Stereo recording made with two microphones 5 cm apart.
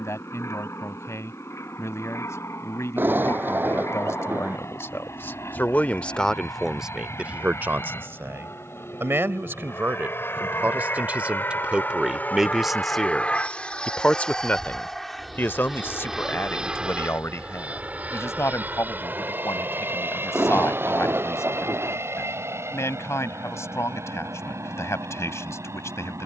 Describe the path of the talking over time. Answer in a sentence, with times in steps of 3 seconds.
In this clip you hear the talking on the left from 0 s, on the right from 6 s, in the centre from 12 s and on the left from 15 s.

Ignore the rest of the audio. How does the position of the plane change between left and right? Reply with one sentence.
In this clip you hear the plane travel towards the right.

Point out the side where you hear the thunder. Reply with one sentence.
You can hear the thunder on the right.